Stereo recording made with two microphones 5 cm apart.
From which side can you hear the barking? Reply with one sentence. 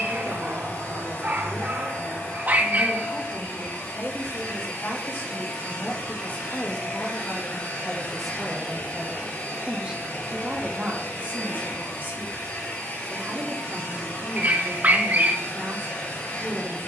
In this clip you hear the barking on the right.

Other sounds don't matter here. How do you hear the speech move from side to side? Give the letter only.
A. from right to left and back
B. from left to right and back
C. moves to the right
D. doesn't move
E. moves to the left
C.